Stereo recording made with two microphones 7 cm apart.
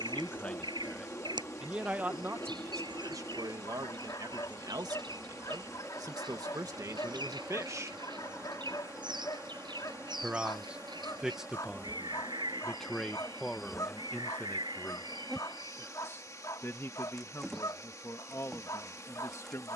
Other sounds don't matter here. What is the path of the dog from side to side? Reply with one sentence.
In this clip you hear the dog stay put.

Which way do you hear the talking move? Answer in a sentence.
You can hear the talking move from left to right and back again.